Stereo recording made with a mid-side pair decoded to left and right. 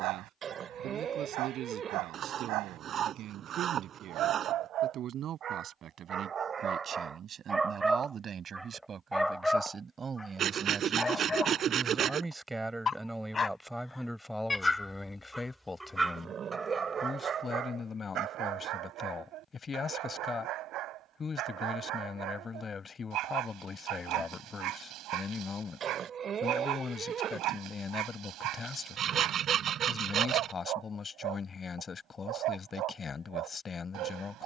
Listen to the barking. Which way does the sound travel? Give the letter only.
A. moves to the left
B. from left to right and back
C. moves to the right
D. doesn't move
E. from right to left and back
E.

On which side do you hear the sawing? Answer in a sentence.
You can hear the sawing on the right.